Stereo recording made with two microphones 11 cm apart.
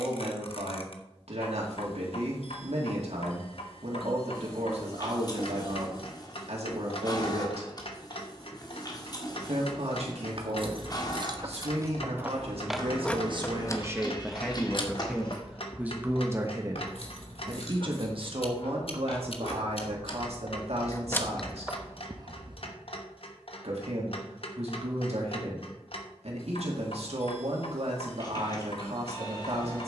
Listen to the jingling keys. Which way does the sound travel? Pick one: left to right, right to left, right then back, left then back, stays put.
left then back.